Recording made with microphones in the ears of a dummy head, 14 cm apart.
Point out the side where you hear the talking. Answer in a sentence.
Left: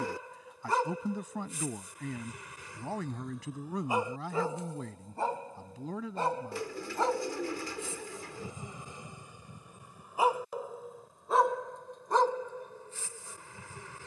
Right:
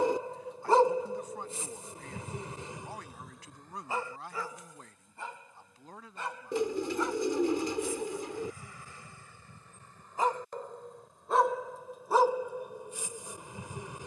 In this clip you hear the talking on the left.